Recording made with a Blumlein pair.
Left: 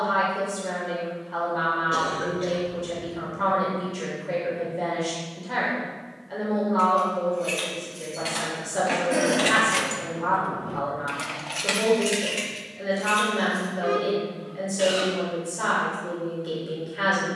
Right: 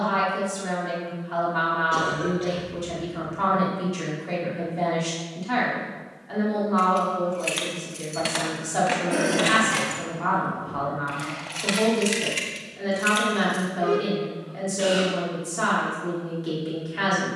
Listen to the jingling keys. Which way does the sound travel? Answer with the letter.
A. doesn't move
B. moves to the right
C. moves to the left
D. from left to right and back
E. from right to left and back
E.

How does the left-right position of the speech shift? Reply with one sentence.
In this clip you hear the speech stay in one place.